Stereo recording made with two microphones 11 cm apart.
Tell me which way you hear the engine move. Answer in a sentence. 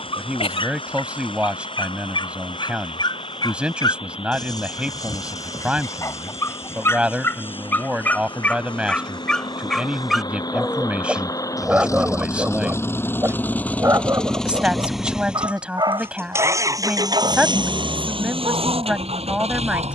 In this clip you hear the engine go from the left side to the right.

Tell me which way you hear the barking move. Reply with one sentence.
In this clip you hear the barking move from left to right.